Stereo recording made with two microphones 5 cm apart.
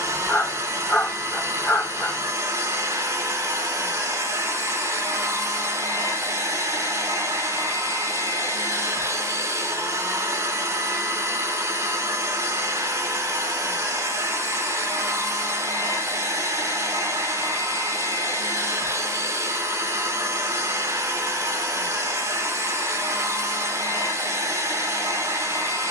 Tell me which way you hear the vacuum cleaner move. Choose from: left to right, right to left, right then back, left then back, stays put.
stays put.